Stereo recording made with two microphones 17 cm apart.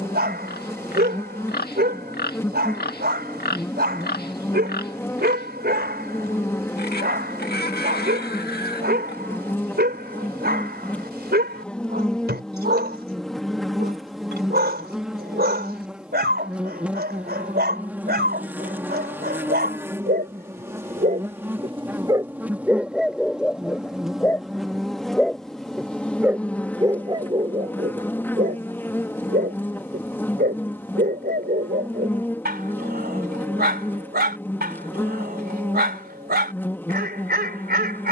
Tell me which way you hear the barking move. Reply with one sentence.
In this clip you hear the barking move from right to left and back again.